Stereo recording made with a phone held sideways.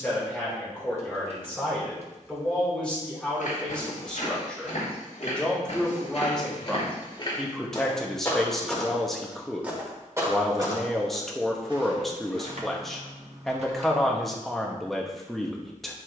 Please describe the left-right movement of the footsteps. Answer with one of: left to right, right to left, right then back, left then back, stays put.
left to right.